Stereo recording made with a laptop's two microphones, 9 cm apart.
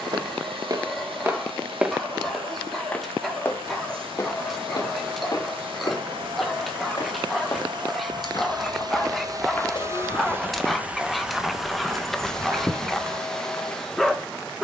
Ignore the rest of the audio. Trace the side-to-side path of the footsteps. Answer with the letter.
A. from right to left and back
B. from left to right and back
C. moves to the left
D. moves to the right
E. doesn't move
A.